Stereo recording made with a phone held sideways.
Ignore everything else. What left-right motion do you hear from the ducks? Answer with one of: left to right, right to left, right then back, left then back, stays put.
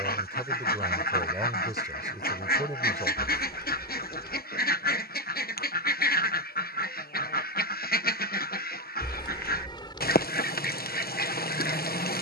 stays put.